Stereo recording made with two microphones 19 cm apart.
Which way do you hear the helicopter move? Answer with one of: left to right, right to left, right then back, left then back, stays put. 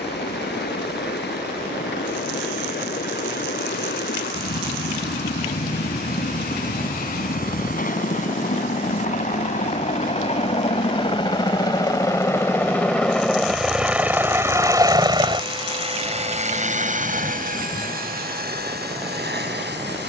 left to right.